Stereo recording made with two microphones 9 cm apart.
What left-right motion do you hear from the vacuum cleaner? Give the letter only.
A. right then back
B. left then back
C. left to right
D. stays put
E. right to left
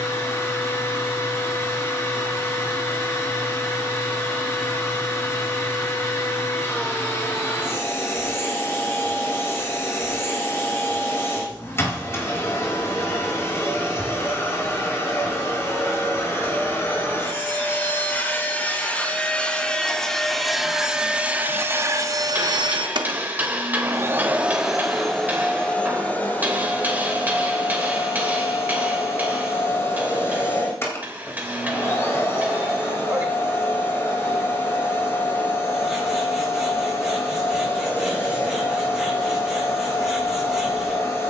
A.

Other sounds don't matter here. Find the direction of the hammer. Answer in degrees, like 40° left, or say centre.
20° right.